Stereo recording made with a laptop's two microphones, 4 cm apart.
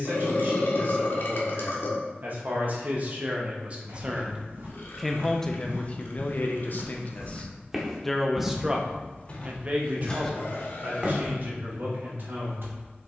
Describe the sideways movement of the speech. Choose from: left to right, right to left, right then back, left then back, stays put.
left then back.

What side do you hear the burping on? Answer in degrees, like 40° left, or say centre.
60° left.